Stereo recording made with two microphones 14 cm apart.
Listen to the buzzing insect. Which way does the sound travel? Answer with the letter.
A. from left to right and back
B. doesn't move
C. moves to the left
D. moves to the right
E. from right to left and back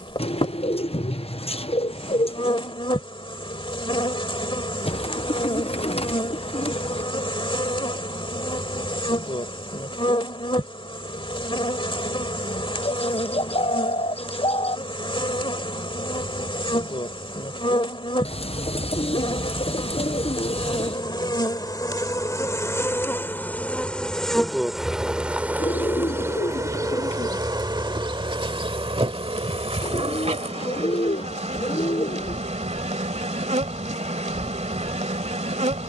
D.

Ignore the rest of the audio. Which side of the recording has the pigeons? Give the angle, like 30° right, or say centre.
50° left.